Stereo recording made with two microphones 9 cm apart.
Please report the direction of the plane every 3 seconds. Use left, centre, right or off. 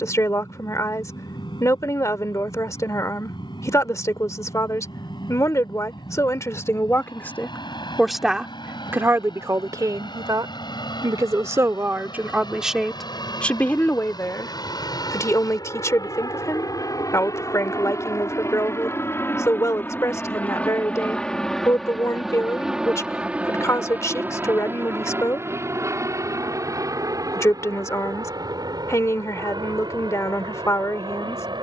left, left, left, left, left, left, left, centre, right, right, right.